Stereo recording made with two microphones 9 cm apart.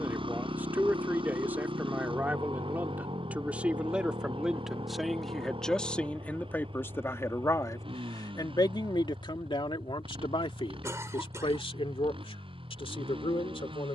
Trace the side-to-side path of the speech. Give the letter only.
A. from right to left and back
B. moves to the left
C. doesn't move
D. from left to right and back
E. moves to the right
B.